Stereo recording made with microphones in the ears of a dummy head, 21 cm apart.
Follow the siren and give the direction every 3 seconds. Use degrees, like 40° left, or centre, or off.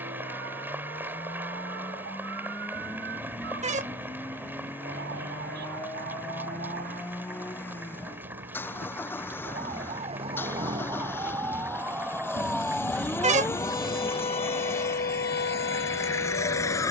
50° right, 40° right, 40° right, 20° right, 10° left, 50° left.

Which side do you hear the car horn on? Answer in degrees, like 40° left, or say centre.
30° right.